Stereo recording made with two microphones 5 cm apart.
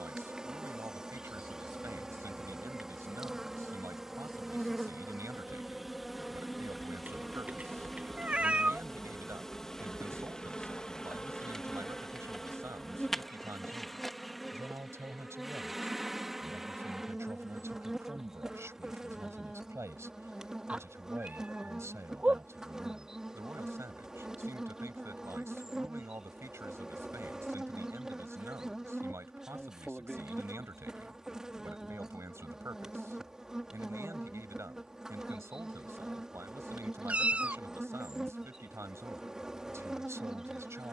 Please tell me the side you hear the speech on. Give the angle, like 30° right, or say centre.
70° right.